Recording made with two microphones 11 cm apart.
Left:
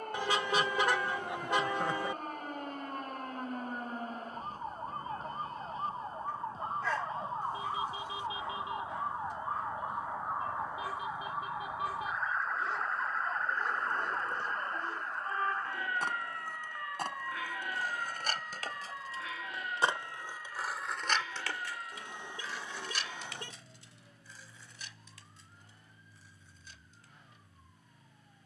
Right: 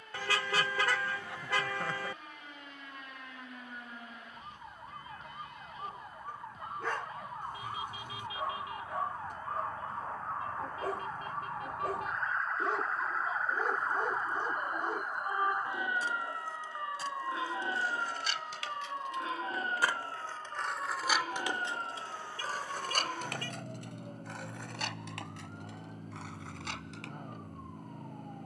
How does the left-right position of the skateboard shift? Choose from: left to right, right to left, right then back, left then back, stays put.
left to right.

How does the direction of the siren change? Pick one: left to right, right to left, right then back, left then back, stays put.
left to right.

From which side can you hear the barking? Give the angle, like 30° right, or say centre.
50° right.